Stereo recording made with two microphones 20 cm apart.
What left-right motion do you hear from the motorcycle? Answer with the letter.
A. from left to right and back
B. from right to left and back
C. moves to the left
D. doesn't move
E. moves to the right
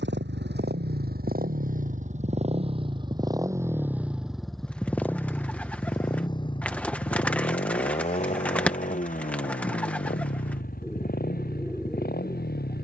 C.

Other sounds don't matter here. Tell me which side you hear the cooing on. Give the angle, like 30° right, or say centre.
10° left.